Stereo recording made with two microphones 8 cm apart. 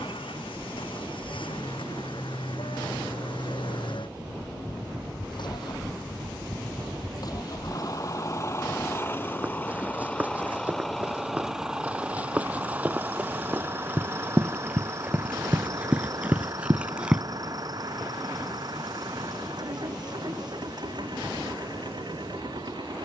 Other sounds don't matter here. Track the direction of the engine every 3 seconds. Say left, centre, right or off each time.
left, left, left, centre, right, right, right, right.